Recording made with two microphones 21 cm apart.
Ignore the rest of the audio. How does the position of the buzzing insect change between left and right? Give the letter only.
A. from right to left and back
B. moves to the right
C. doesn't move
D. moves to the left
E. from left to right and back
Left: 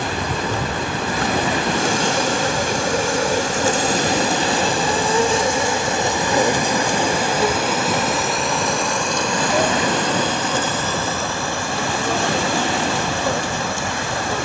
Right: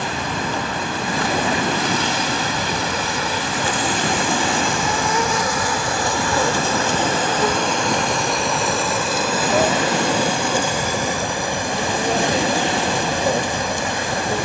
B.